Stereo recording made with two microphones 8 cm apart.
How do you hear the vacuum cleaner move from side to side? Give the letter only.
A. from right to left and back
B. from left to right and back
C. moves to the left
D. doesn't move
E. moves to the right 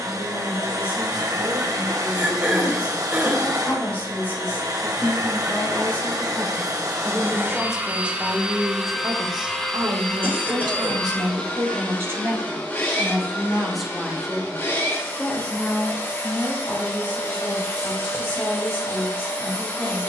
C.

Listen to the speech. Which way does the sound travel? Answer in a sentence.
In this clip you hear the speech move from left to right and back again.